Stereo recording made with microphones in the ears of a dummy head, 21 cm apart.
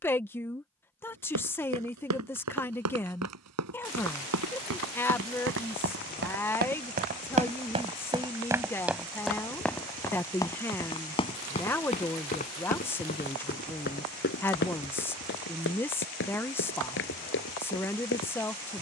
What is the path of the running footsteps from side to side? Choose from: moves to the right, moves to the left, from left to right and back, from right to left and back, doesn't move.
moves to the left.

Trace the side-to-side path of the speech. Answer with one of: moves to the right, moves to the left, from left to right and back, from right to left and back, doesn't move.
doesn't move.